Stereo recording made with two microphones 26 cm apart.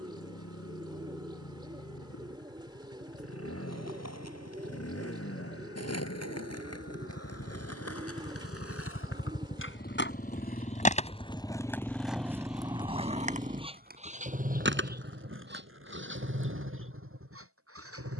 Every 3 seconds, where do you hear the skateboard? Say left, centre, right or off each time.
off, left, left, left, right, right.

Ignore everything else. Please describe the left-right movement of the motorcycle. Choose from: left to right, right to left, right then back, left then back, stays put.
left to right.